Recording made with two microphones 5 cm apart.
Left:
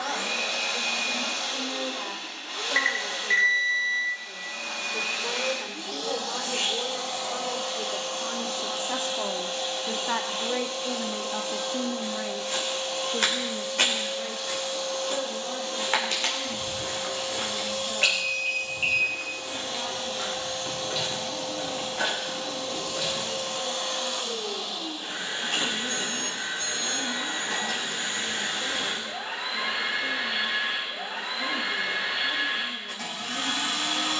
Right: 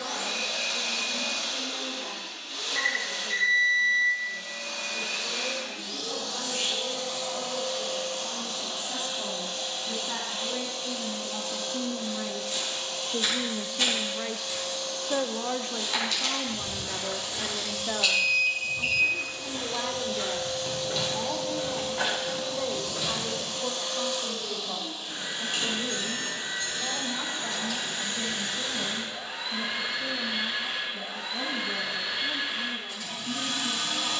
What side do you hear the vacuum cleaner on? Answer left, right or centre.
left.